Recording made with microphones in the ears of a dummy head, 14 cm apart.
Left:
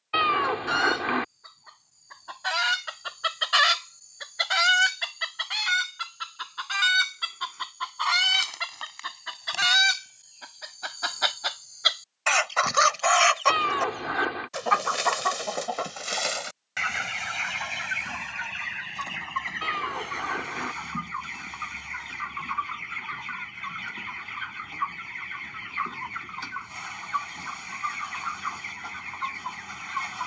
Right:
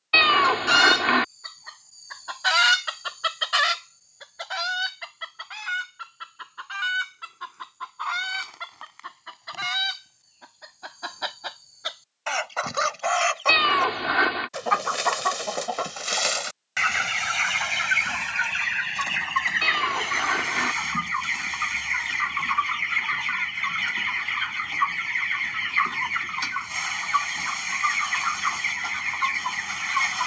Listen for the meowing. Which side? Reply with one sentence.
You can hear the meowing on the right.